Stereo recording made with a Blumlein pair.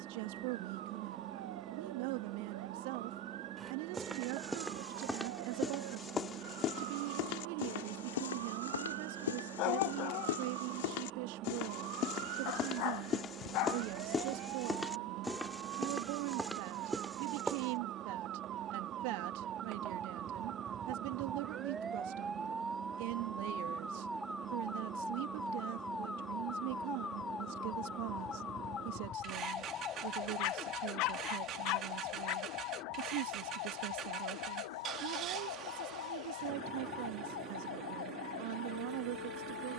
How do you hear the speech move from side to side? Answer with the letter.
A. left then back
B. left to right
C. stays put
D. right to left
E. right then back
C.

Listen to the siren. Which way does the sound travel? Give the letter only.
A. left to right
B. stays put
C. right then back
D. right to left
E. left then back
D.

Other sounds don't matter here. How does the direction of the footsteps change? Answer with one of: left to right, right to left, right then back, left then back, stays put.
left then back.